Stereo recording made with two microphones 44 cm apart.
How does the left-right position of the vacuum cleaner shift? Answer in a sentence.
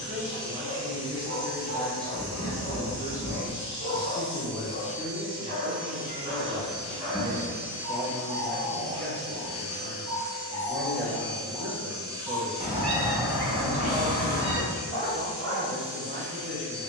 You can hear the vacuum cleaner move from right to left and back again.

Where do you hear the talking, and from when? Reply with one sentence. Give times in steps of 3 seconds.
In this clip you hear the talking in the centre from 0 s and on the right from 6 s.